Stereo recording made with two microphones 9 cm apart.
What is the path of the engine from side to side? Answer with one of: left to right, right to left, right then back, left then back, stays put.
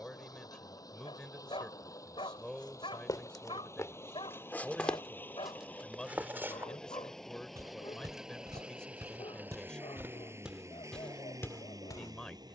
left to right.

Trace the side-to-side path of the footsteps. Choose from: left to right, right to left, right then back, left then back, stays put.
right then back.